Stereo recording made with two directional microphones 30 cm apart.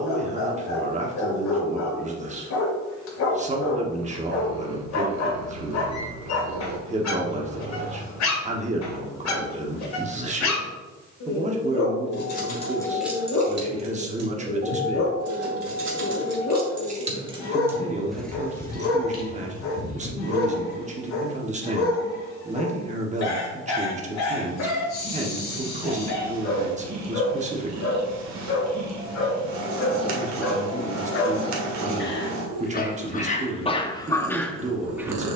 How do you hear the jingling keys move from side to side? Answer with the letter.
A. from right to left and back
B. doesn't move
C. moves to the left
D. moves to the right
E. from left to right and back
E.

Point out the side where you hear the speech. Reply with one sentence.
In this clip you hear the speech on the right.